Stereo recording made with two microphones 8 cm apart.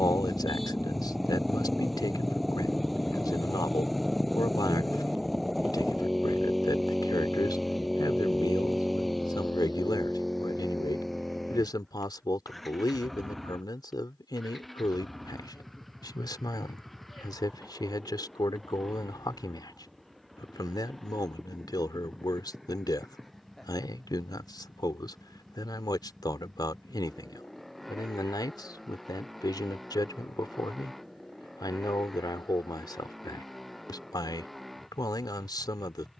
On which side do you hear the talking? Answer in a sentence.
In this clip you hear the talking on the left.